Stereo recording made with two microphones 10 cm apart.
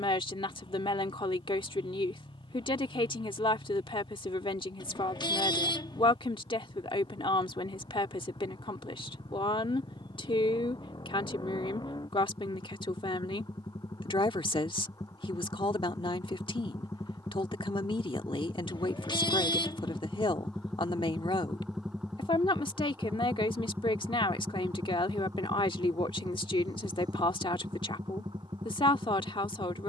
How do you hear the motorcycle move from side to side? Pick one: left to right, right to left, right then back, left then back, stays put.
left to right.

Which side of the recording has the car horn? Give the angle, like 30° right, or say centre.
50° left.